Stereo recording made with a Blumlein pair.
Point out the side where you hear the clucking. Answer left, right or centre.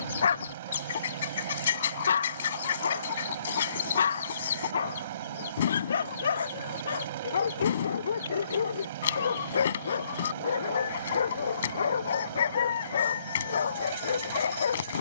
left.